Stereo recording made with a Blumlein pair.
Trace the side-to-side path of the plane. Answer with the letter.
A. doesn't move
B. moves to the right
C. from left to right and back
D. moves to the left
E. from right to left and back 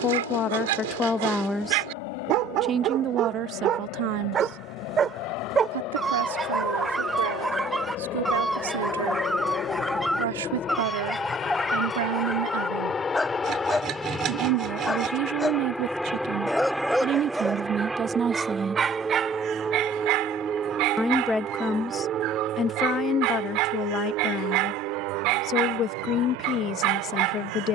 B.